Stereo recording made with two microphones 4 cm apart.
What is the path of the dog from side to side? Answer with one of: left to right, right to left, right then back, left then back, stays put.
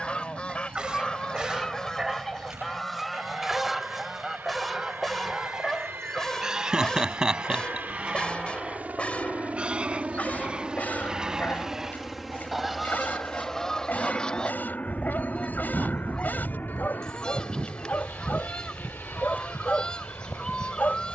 right to left.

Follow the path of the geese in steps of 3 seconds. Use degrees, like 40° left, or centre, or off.
20° left, 10° right, 20° right, 20° right, 10° left, 20° left, 20° left.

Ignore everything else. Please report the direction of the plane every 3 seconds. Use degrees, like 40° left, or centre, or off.
70° right, 60° right, 50° right, 20° right, 10° left, 40° left, 60° left.